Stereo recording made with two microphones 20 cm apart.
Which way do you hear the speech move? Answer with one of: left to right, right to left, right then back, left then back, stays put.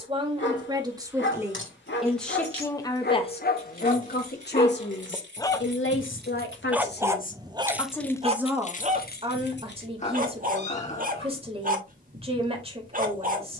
left then back.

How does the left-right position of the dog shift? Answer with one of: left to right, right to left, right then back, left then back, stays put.
left to right.